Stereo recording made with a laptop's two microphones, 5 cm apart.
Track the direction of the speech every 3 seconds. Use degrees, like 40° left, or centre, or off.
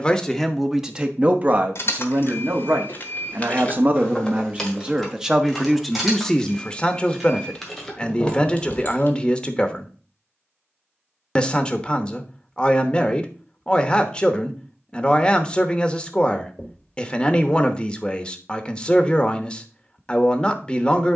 30° right, 20° right, 20° left, 20° left, 20° left, 20° left, 20° left.